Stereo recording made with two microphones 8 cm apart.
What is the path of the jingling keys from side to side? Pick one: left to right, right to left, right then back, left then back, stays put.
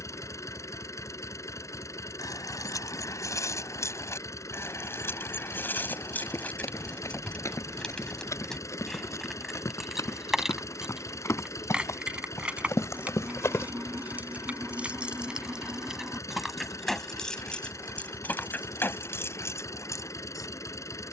right then back.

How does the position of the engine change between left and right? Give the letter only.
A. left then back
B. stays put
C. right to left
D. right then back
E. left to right
B.